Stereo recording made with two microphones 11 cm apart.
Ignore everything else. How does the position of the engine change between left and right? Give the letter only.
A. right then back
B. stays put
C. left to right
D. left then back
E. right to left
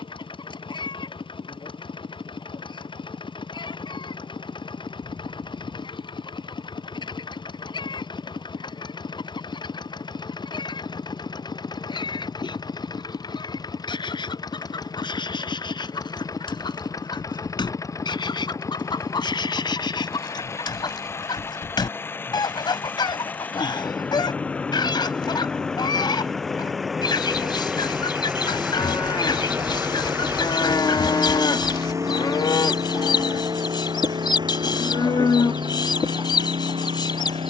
C.